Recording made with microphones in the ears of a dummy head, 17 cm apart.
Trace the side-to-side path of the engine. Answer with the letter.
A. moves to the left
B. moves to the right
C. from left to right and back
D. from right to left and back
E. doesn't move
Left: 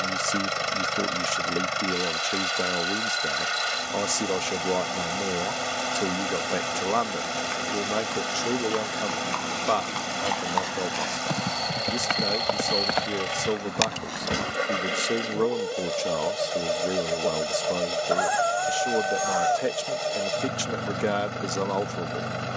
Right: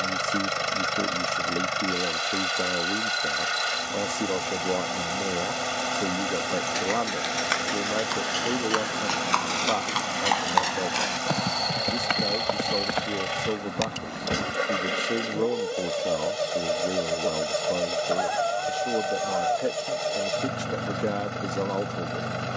E.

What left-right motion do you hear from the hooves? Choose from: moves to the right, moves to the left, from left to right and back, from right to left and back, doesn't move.
moves to the left.